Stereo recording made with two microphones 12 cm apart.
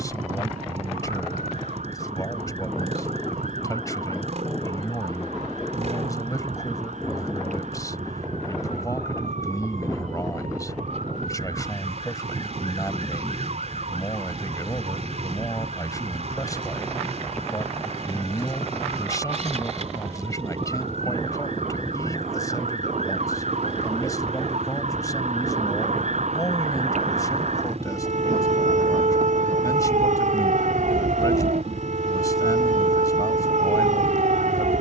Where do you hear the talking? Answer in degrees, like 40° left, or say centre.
30° left.